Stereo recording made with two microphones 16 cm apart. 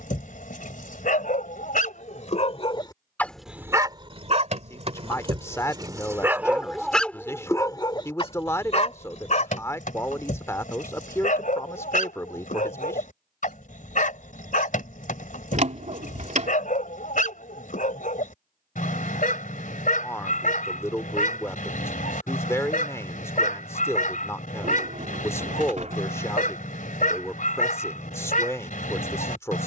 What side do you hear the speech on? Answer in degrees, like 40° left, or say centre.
20° left.